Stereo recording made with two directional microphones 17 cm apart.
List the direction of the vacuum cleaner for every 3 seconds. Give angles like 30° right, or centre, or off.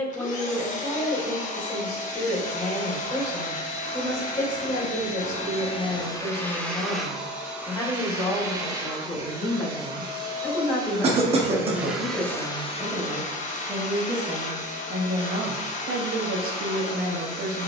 50° left, 40° left, 10° right, 20° right, 40° left, 50° left.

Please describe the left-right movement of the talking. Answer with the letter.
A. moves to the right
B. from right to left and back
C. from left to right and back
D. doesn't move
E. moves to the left
A.